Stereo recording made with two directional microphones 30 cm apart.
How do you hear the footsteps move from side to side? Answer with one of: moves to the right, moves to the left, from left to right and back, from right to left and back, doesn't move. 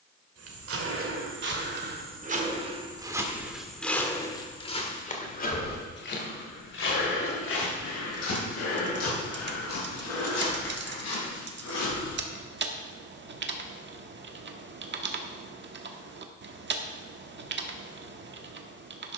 moves to the left.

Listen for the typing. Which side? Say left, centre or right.
right.